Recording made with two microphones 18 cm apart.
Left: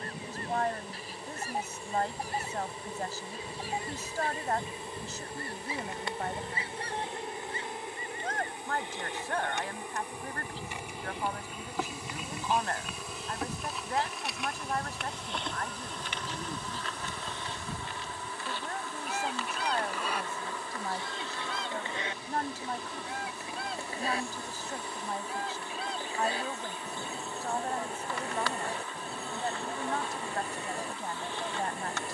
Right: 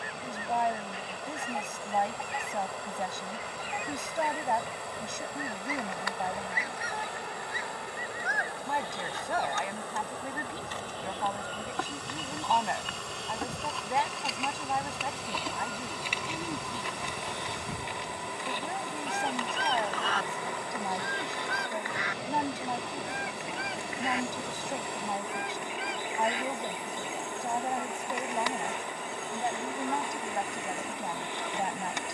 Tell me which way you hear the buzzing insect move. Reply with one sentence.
You can hear the buzzing insect go from the left side to the right.